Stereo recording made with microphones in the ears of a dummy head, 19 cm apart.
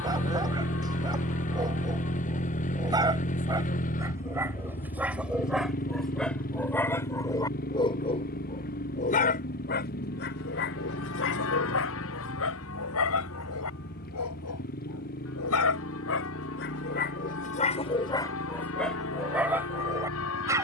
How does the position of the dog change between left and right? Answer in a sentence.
In this clip you hear the dog move from right to left and back again.